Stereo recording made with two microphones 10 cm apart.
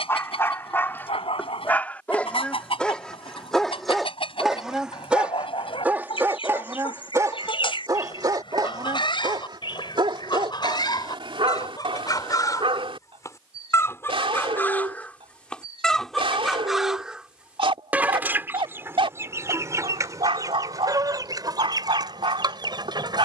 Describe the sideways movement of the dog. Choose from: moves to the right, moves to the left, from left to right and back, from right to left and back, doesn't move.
moves to the right.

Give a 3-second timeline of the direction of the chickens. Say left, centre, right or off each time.
left, left, left, left, left, centre, right, right.